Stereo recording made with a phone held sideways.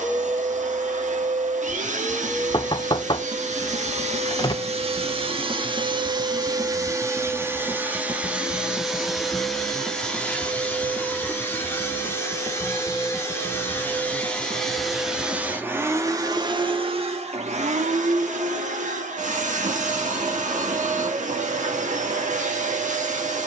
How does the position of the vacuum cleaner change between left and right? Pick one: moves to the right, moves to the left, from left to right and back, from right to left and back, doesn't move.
from right to left and back.